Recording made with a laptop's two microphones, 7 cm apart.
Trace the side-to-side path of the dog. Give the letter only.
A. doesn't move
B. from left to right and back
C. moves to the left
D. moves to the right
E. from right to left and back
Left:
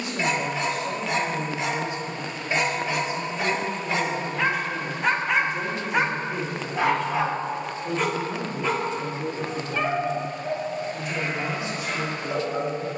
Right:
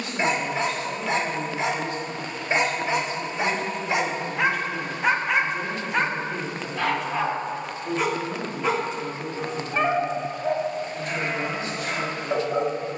E.